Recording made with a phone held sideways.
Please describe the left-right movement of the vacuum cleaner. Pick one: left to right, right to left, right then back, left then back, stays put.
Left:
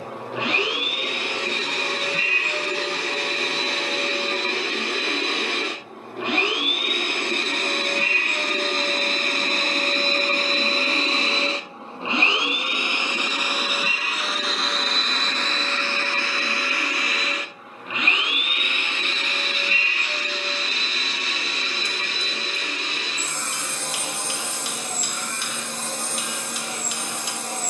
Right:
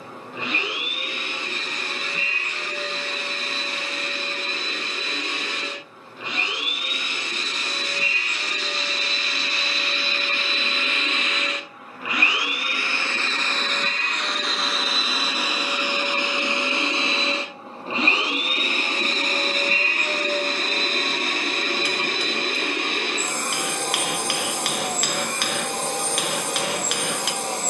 left to right.